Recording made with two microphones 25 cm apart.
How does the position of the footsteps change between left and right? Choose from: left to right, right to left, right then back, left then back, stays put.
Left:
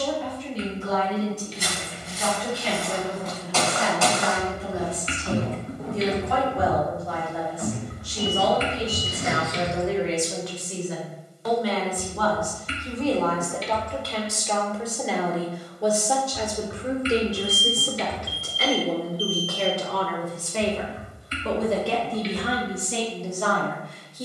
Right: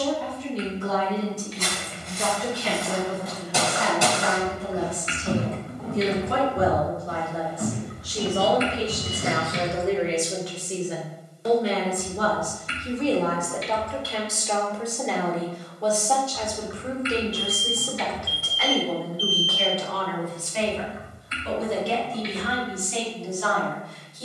left to right.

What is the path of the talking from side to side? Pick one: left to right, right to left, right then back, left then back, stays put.
right to left.